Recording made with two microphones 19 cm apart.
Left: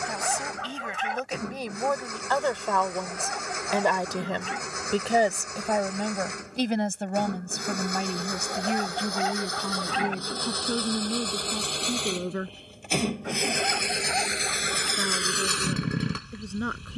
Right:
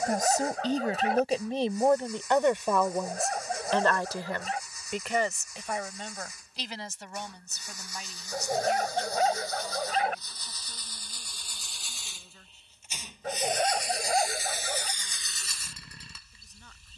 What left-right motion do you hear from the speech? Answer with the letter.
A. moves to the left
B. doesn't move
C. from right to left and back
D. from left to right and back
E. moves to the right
A.